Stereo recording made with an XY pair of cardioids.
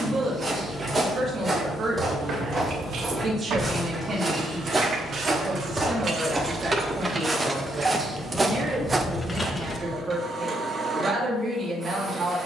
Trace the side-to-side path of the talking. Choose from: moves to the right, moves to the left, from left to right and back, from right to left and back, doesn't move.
doesn't move.